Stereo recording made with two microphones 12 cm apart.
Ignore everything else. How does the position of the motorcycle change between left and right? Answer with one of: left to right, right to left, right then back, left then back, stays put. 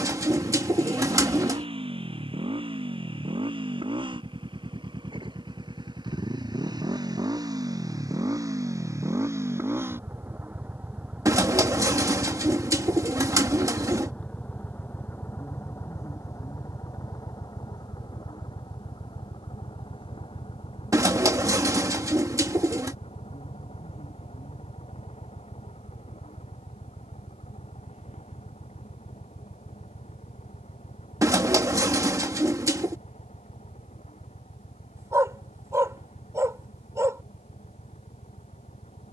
right to left.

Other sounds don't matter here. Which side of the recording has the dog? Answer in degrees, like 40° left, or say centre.
30° right.